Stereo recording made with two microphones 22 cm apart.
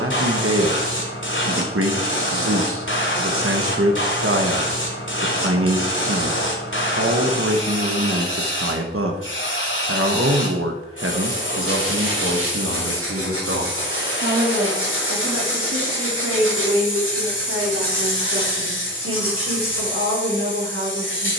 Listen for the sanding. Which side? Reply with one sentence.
You can hear the sanding on the right.